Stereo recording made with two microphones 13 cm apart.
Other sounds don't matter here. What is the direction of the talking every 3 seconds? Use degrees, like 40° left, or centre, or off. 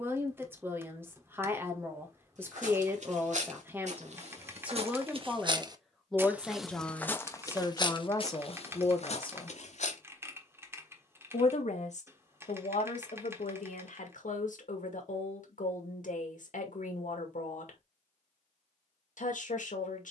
20° right, 10° right, 20° left, 50° left, 70° left, 70° left, 70° left.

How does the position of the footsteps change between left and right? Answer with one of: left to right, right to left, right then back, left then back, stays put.
right to left.